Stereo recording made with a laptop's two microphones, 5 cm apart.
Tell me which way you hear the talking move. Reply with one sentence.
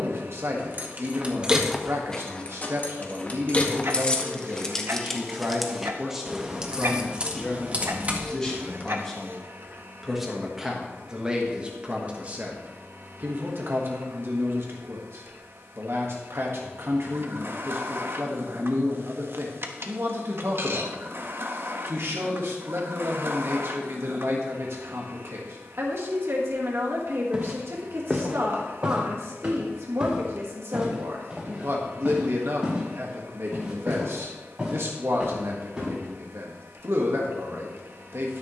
You can hear the talking go left and come back.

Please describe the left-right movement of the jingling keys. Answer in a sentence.
You can hear the jingling keys move from right to left and back again.